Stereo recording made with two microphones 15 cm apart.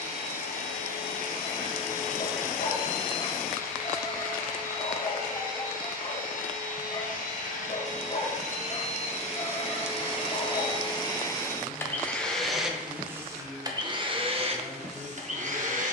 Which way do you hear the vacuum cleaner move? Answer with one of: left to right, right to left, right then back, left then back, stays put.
left to right.